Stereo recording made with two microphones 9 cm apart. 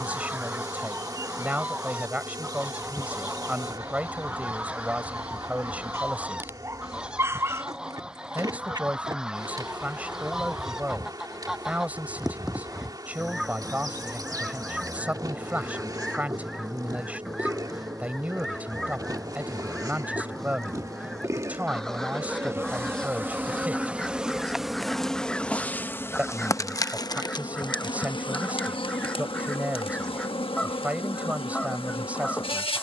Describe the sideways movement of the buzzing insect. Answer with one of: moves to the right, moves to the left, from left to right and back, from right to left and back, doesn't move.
moves to the left.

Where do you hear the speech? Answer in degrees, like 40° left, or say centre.
20° right.